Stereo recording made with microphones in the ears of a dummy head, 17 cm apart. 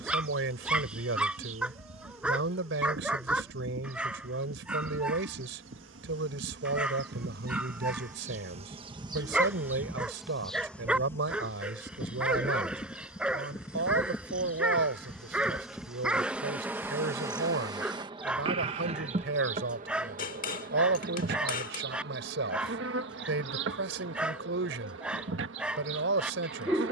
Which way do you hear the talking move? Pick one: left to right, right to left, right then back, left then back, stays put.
stays put.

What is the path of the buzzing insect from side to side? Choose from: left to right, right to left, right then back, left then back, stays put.
left then back.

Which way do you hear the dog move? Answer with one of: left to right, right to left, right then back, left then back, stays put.
stays put.